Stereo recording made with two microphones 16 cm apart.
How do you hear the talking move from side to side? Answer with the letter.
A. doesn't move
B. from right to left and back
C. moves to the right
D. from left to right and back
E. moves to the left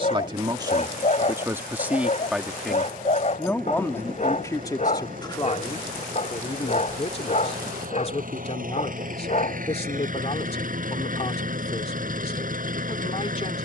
E.